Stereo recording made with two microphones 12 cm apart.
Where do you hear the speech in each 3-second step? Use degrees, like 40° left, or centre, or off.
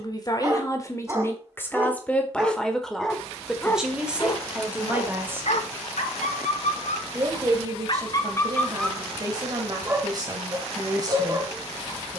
20° left, 10° right, 30° right, 30° right.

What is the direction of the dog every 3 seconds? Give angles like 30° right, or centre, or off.
20° right, 40° left, 50° left, 20° right.